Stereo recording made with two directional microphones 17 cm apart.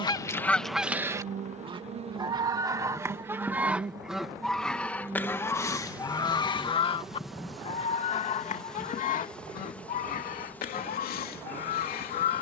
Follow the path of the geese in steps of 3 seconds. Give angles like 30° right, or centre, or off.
10° right, centre, 40° left, 60° left.